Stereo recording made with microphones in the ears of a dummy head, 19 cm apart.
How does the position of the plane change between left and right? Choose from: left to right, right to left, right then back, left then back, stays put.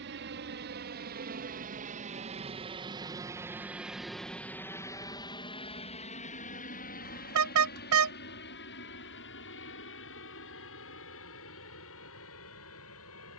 right to left.